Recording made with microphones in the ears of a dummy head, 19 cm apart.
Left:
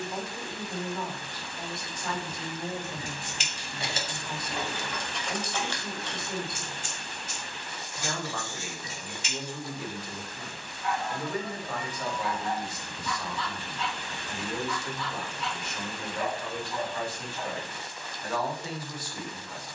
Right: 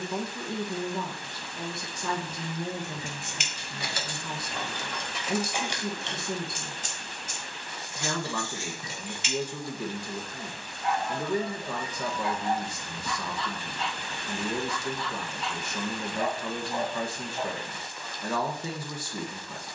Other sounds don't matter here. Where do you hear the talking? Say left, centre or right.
right.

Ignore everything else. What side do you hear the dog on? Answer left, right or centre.
right.